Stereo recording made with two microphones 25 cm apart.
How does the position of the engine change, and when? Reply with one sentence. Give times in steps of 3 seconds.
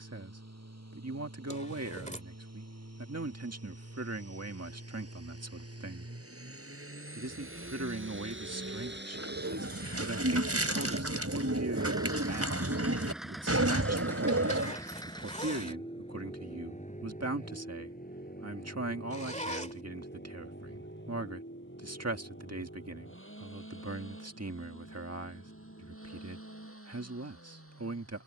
In this clip you hear the engine on the right from 0 s, in the centre from 12 s and on the left from 15 s.